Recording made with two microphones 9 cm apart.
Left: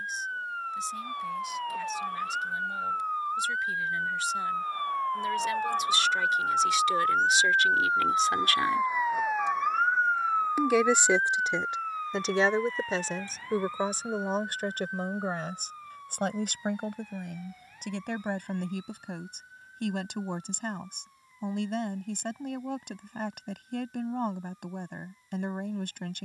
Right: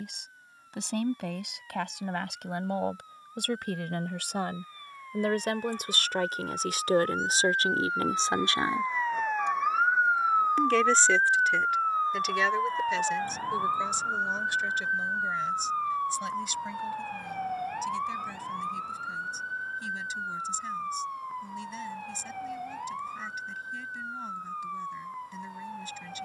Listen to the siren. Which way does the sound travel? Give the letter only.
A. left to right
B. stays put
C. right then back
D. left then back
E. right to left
A.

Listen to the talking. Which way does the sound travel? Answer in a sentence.
In this clip you hear the talking move from right to left.